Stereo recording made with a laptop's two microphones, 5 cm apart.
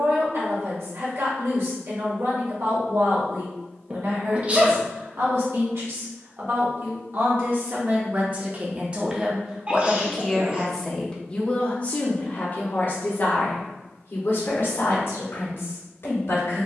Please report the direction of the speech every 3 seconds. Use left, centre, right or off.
right, right, right, centre, left, left.